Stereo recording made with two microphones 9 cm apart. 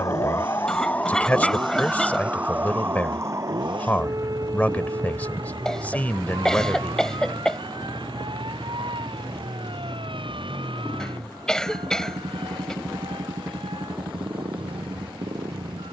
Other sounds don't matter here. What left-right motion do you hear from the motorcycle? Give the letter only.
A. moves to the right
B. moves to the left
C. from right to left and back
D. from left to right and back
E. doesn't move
E.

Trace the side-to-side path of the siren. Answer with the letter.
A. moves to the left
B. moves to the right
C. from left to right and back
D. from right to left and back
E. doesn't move
B.